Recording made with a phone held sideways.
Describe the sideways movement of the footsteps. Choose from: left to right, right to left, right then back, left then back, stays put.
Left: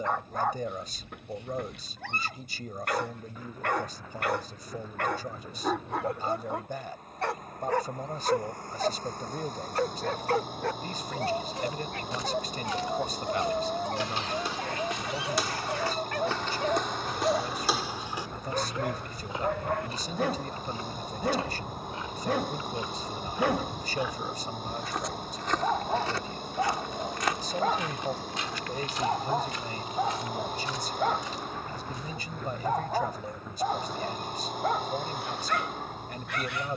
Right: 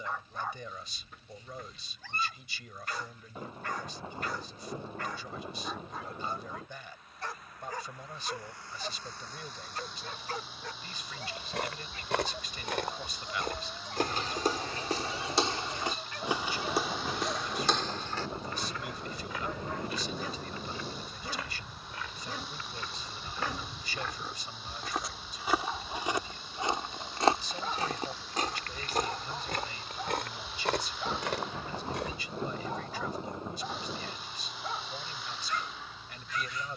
left then back.